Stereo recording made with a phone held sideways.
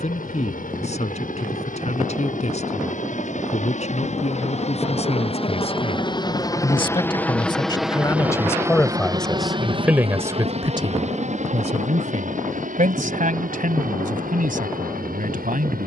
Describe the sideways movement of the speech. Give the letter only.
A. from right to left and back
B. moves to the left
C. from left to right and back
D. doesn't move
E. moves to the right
E.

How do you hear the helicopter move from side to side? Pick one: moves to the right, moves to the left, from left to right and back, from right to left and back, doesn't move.
moves to the right.